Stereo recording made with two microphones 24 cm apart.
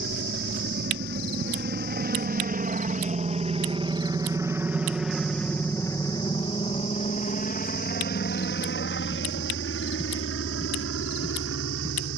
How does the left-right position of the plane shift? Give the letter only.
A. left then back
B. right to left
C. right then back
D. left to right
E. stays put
B.